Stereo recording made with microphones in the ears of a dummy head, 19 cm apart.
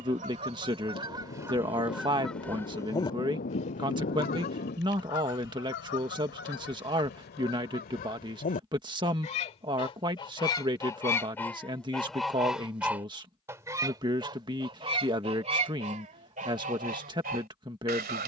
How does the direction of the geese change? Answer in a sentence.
In this clip you hear the geese go left and come back.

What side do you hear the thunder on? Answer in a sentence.
In this clip you hear the thunder on the left.